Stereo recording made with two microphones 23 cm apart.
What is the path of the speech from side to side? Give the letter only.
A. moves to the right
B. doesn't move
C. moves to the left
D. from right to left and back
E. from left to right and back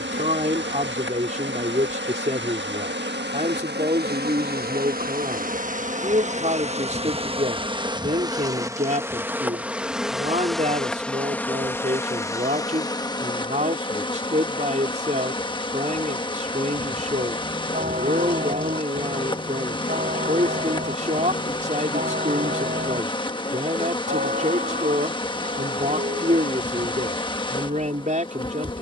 B.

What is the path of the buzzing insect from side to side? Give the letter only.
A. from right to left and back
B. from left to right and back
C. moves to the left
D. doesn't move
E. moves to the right
C.